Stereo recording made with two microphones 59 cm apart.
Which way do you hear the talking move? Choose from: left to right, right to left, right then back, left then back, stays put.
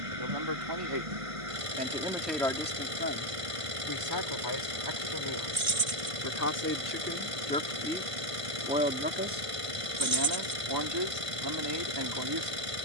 left then back.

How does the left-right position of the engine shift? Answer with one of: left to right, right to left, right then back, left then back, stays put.
stays put.